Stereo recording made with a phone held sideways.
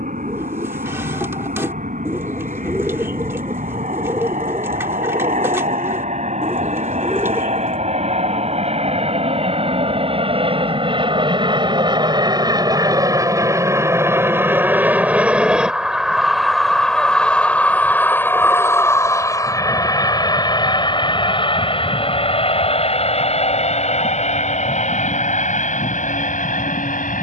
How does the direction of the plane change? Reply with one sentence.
You can hear the plane move from right to left.